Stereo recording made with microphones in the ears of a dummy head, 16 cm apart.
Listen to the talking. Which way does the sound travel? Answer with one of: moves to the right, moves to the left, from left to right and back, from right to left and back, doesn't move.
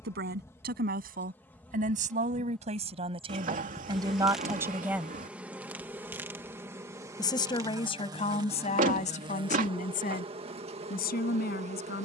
moves to the left.